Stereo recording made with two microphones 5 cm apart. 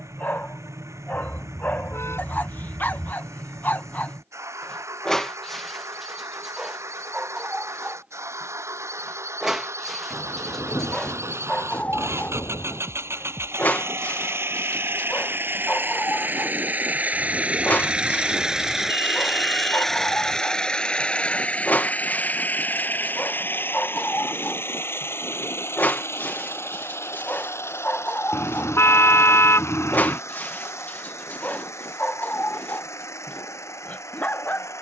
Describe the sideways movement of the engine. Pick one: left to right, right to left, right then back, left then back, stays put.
right to left.